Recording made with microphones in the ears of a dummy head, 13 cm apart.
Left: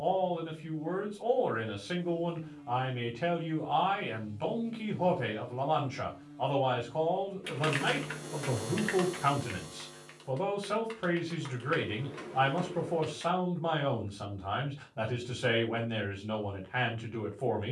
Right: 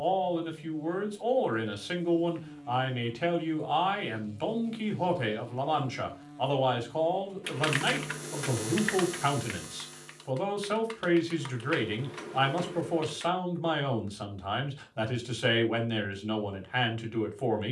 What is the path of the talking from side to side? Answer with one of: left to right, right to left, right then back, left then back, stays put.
stays put.